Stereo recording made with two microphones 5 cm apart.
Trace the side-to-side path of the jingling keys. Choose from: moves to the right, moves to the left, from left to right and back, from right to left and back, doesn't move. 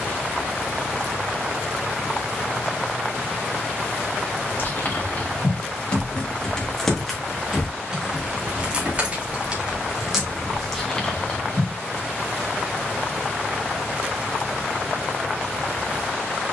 from left to right and back.